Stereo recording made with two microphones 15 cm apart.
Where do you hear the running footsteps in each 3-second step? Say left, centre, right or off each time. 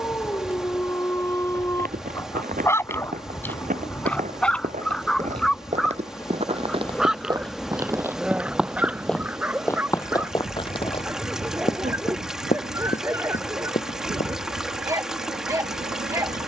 right, right, right, left, left, off.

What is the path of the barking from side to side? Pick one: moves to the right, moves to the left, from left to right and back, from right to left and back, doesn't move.
moves to the right.